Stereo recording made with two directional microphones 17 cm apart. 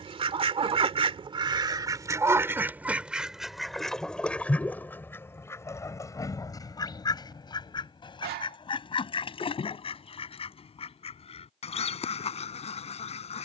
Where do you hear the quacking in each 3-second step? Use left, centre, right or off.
right, centre, left, left, left.